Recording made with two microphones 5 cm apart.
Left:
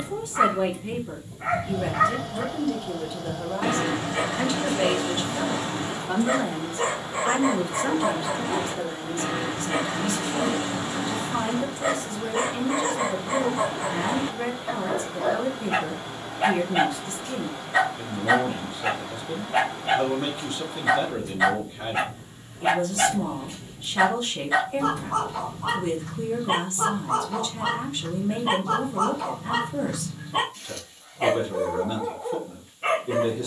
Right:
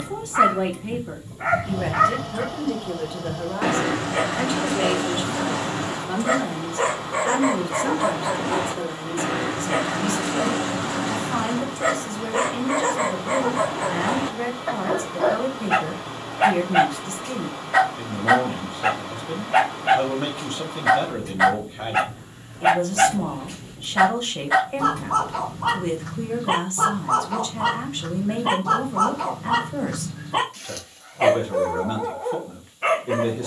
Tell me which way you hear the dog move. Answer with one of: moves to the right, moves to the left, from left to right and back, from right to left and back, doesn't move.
doesn't move.